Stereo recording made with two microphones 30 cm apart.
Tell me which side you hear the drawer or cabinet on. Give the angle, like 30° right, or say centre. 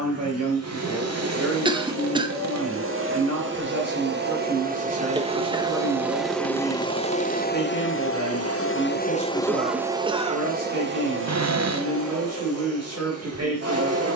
60° right.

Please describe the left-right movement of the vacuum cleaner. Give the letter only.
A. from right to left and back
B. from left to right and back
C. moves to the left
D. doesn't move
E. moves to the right
A.